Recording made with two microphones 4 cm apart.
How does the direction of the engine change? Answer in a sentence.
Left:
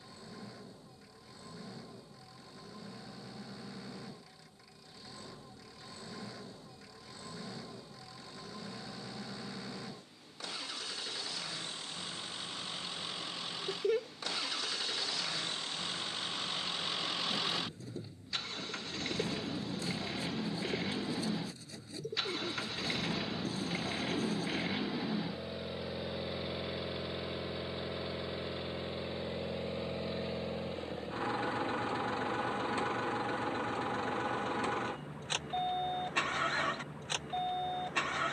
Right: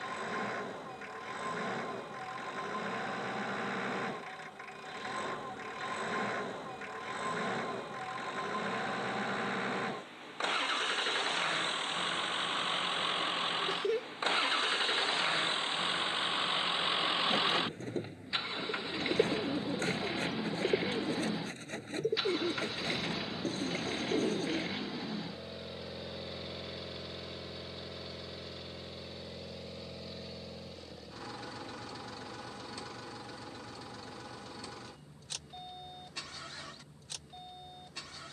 You can hear the engine travel towards the left.